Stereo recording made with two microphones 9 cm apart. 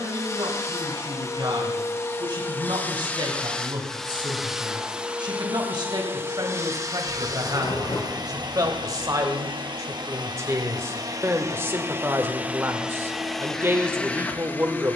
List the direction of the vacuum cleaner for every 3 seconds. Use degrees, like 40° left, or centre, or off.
30° left, centre, 40° right, 40° right, centre.